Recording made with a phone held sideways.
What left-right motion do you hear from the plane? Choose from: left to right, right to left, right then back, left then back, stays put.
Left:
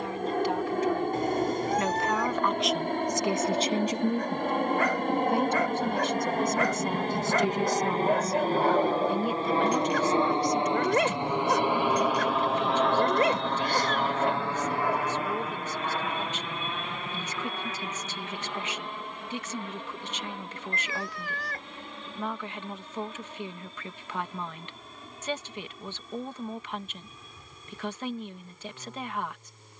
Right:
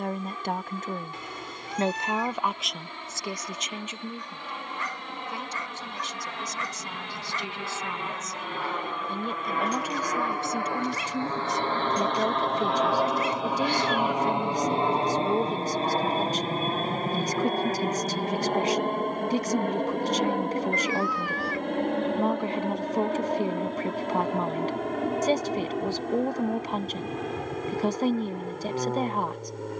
left to right.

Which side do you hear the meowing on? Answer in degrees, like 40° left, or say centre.
50° left.